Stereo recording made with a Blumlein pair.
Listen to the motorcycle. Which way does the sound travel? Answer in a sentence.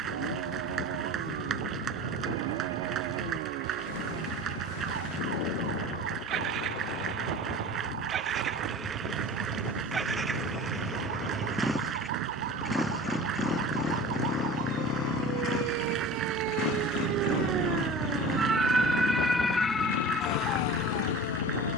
In this clip you hear the motorcycle travel towards the left.